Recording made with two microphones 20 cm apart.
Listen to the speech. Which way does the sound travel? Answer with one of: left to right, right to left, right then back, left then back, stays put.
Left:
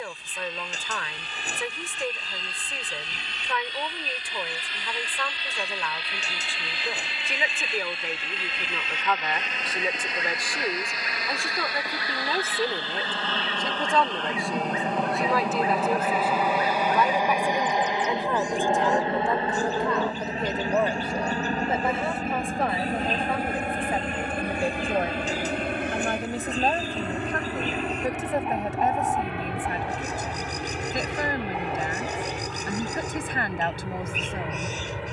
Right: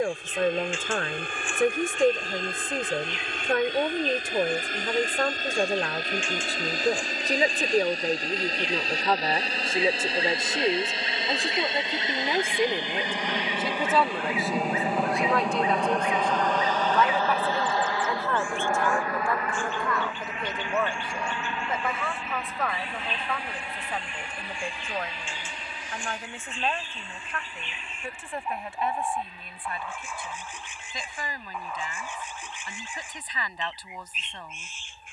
right to left.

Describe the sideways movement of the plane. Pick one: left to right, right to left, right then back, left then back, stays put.
right to left.